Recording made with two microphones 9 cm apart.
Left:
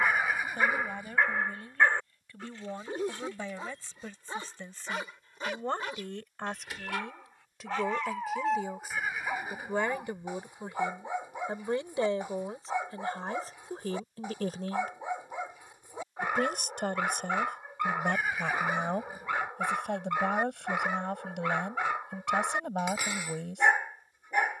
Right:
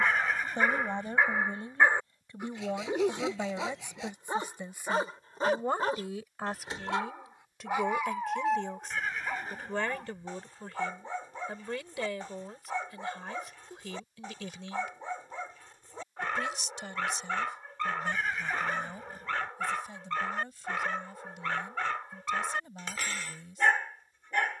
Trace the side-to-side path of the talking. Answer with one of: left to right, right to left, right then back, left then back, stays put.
right to left.